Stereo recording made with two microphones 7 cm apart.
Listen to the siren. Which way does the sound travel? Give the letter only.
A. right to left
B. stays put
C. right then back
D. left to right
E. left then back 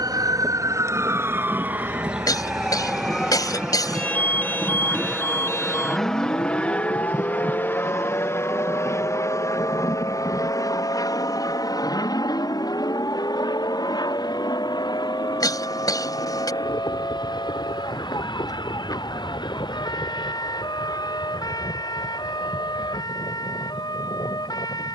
A.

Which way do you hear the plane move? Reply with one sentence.
In this clip you hear the plane move to the left.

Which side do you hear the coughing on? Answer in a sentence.
You can hear the coughing on the left.